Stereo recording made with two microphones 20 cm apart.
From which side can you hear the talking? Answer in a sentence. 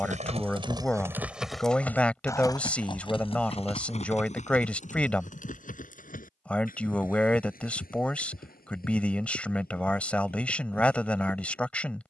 You can hear the talking in the centre.